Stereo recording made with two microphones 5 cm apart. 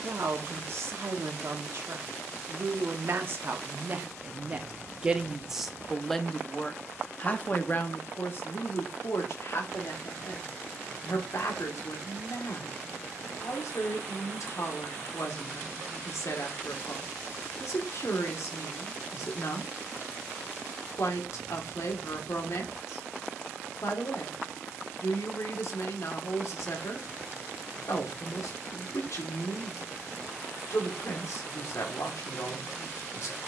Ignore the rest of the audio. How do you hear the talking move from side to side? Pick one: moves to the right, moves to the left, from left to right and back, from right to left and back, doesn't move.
moves to the left.